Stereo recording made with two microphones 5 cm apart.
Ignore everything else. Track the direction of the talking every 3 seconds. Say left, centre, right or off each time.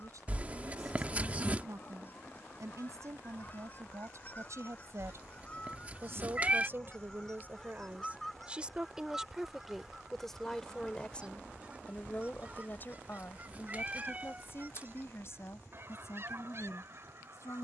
right, right, right, centre, left, left.